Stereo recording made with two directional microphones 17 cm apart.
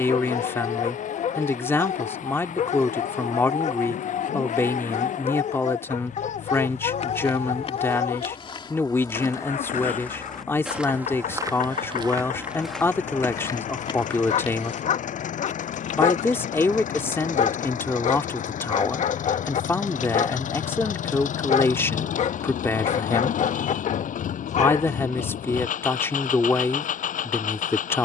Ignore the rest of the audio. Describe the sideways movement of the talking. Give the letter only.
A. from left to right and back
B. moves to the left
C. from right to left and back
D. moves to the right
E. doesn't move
E.